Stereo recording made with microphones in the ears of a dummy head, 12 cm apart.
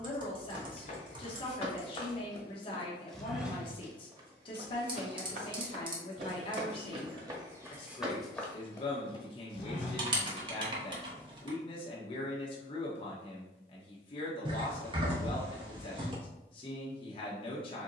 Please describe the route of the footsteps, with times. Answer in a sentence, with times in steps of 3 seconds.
You can hear the footsteps on the left from 0 s, on the right from 3 s, on the left from 9 s and not at all from 12 s.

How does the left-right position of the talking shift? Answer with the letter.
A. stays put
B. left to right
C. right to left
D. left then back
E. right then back
A.